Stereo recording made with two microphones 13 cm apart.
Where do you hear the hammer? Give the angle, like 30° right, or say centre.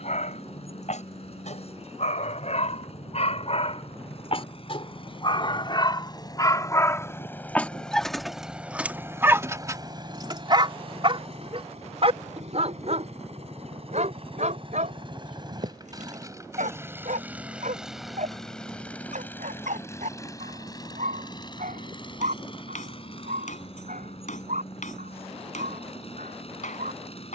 70° left.